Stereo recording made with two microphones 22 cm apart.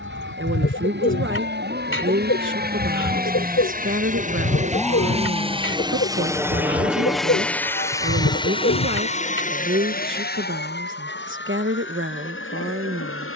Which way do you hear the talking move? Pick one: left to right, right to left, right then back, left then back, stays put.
stays put.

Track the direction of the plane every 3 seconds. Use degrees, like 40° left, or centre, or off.
60° right, 40° right, 10° left, 40° left, 60° left.